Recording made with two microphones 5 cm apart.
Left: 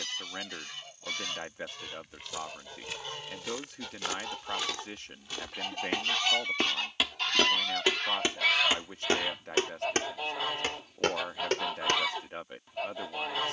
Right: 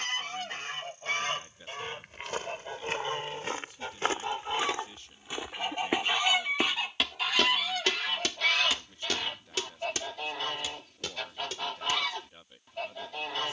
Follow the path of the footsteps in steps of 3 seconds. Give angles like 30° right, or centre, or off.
50° right, 30° right, 10° left, 40° left, off.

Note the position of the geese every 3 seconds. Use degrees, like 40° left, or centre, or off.
40° right, 30° right, centre, 10° left, 10° left.